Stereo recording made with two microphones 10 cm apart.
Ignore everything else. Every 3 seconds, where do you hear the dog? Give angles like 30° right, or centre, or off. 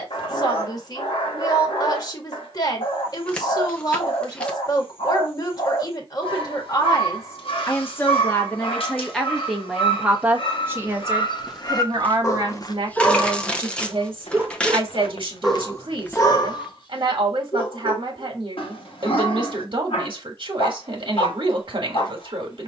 60° left, 60° left, 60° left, 60° left, centre, 40° left, 60° left, 60° left.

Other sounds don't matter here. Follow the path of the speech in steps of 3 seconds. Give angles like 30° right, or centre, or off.
40° left, 40° left, 30° left, 20° right, 50° right, 60° right, 60° right, 60° right.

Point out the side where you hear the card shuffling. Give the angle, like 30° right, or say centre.
10° left.